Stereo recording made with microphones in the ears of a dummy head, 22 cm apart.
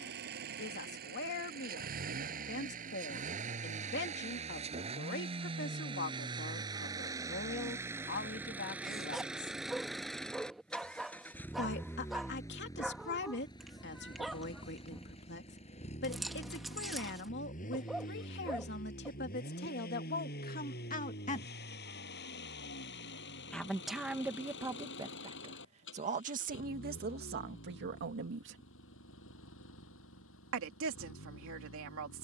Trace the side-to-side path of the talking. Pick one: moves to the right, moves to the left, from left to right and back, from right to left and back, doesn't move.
moves to the right.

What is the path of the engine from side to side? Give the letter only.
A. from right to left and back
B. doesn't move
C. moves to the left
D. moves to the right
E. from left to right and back
C.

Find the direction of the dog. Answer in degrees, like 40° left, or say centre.
centre.